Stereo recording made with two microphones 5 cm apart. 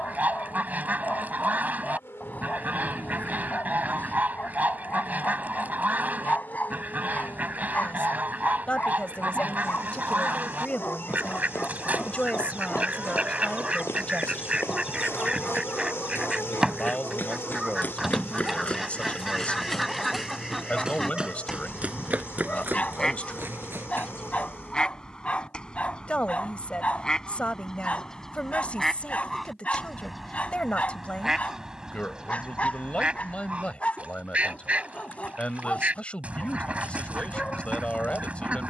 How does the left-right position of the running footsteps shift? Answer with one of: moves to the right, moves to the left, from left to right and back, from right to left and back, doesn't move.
moves to the right.